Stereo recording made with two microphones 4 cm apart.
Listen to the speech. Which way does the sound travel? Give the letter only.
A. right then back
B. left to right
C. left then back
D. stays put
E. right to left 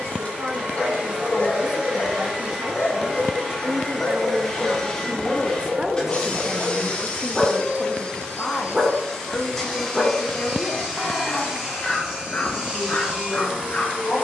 E.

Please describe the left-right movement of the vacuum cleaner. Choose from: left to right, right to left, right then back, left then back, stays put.
left then back.